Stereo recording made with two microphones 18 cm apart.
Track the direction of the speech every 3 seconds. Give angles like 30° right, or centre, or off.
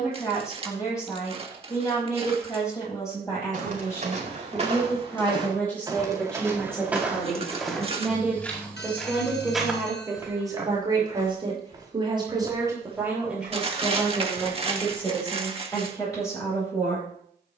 20° left, 10° left, centre, 20° right, 10° right, 20° left.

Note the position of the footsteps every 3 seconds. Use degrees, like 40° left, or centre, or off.
off, 40° right, centre, 10° right, 30° right, off.